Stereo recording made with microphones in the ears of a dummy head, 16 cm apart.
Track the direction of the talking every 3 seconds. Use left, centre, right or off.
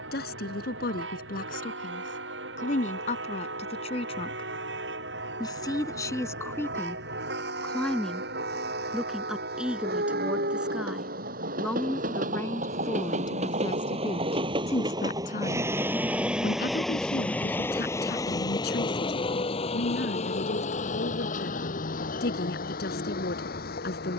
left, left, centre, centre, left, left, left, left.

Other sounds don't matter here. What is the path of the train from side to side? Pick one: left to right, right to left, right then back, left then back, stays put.
right to left.